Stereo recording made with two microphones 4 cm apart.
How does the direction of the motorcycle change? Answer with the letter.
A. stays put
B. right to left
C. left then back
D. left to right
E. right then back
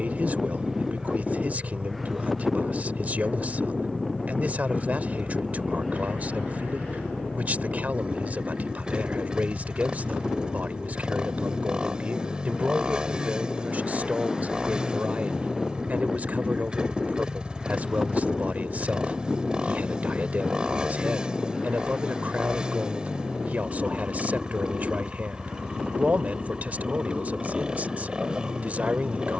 A.